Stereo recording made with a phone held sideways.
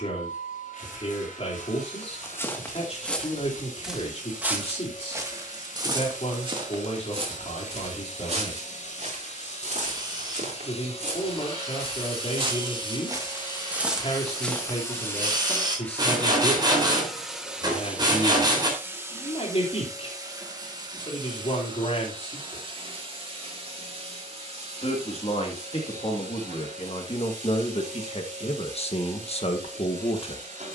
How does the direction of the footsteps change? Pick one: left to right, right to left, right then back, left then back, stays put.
right then back.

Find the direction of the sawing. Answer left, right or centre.
right.